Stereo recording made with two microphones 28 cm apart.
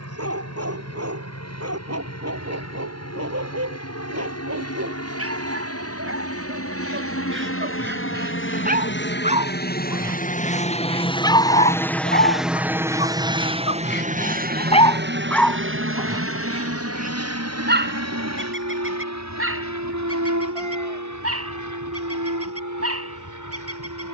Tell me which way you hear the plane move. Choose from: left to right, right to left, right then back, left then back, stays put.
left to right.